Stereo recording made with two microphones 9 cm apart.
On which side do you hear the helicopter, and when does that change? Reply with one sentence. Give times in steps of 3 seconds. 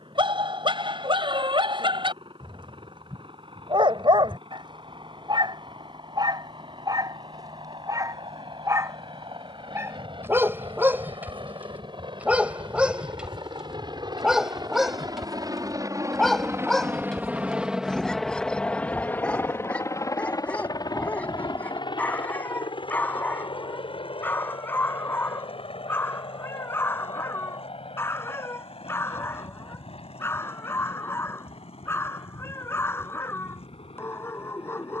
In this clip you hear the helicopter on the right from 0 s and on the left from 18 s.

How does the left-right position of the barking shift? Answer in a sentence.
In this clip you hear the barking go from the right side to the left.